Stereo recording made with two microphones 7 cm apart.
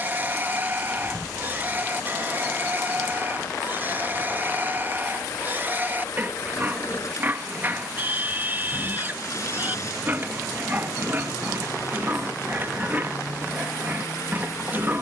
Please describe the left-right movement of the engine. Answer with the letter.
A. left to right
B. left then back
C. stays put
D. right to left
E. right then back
C.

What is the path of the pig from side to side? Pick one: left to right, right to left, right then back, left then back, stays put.
stays put.